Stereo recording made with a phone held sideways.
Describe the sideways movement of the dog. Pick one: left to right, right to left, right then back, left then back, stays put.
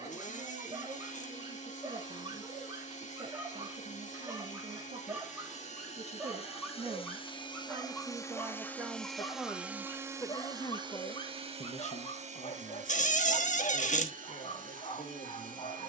right to left.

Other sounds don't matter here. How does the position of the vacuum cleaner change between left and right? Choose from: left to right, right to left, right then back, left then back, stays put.
left to right.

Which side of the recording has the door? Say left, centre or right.
left.